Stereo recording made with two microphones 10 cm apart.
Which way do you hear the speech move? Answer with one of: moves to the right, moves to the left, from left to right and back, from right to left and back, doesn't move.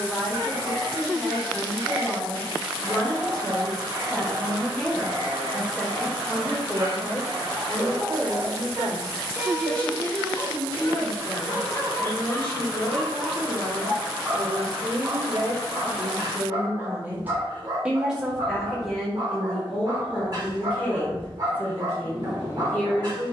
from left to right and back.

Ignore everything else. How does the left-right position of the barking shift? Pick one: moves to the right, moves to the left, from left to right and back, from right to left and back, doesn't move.
from right to left and back.